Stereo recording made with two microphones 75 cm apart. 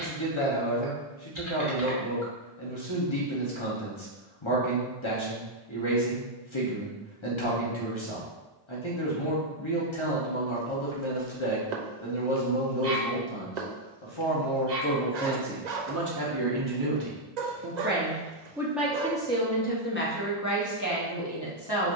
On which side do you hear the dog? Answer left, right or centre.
right.